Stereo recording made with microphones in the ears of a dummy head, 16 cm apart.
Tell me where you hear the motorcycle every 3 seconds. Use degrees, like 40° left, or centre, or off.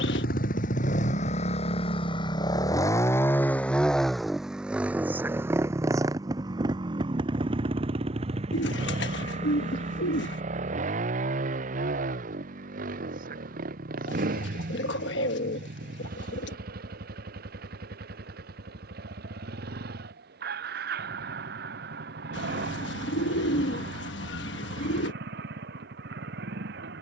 40° left, centre, 30° right, 40° right, 50° right, 50° right, 50° right, 60° right, 60° right.